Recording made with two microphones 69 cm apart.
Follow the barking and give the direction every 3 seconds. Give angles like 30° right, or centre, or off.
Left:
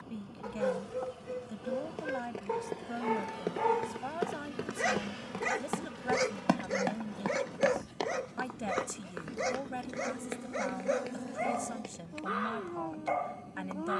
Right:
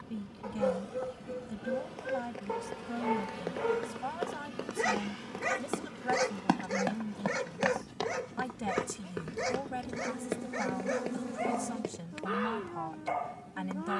50° left, 10° left, 40° right, 60° right, 60° right.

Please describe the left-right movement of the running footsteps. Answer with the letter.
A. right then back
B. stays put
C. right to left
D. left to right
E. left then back
D.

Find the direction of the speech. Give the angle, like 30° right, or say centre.
30° right.